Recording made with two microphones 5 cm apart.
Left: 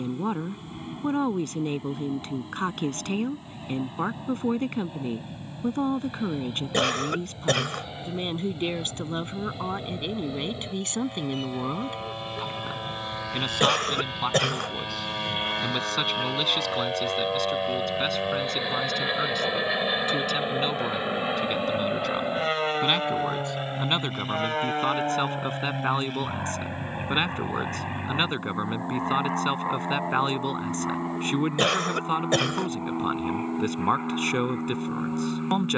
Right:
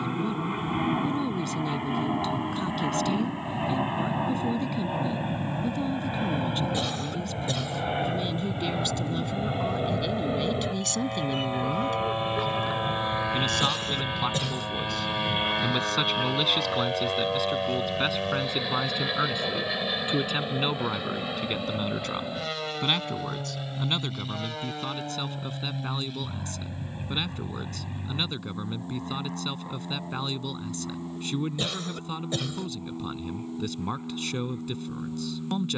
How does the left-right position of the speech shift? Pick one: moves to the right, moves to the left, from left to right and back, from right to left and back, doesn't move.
from left to right and back.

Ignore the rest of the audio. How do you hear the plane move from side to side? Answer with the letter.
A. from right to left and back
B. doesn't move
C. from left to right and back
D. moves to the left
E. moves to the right
D.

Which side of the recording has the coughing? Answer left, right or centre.
left.